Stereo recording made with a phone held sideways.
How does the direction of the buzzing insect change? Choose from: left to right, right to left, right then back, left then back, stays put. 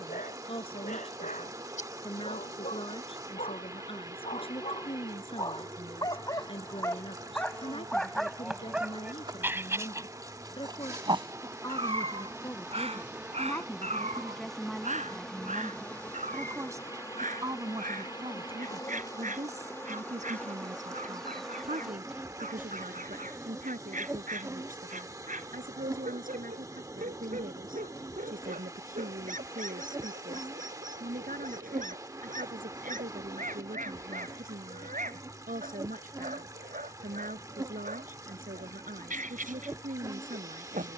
left then back.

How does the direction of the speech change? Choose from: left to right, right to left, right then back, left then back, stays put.
left to right.